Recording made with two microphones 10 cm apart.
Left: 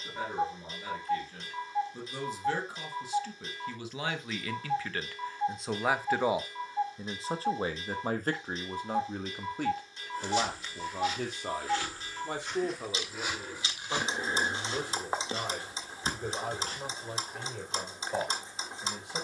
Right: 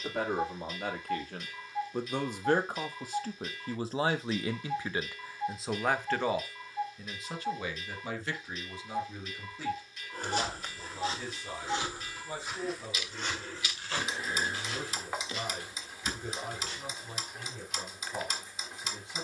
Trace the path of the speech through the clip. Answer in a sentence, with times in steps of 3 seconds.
In this clip you hear the speech on the right from 0 s and on the left from 6 s.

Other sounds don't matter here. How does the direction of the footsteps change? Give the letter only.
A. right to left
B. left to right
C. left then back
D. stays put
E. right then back
A.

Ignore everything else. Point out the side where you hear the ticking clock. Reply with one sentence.
You can hear the ticking clock on the left.